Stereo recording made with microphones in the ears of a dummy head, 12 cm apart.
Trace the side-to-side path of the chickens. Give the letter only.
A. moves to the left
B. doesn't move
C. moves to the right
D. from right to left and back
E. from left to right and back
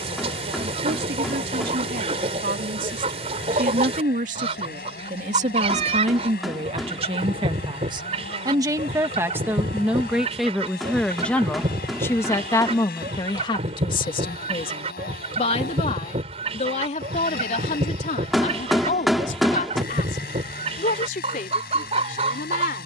B.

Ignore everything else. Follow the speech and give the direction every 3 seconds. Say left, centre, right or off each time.
right, right, right, centre, left, left, left, left.